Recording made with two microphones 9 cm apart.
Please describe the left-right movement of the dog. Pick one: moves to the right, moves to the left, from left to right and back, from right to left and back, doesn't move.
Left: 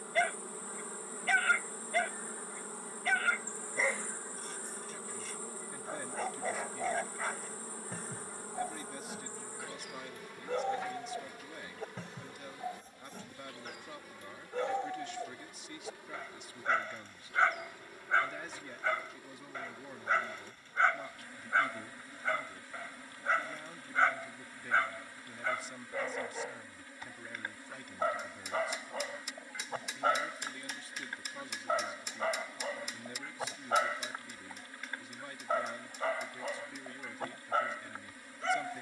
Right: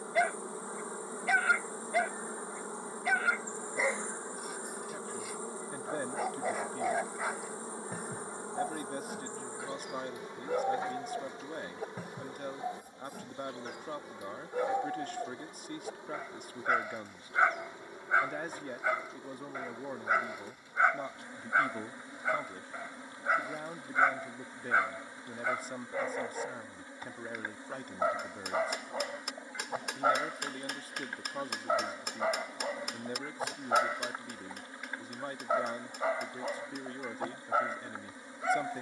doesn't move.